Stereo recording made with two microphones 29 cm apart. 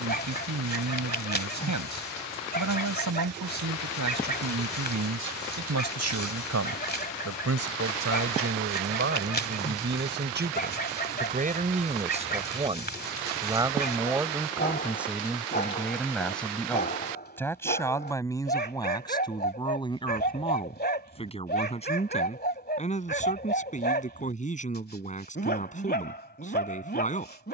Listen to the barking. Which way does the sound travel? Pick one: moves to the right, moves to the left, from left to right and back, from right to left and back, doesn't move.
doesn't move.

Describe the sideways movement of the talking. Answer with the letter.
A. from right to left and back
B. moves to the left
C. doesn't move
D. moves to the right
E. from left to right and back
B.